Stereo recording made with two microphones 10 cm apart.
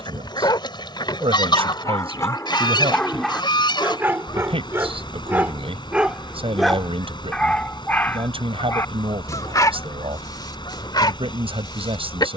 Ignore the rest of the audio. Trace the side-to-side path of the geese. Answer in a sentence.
In this clip you hear the geese stay put.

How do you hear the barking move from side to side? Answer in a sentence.
You can hear the barking move from left to right and back again.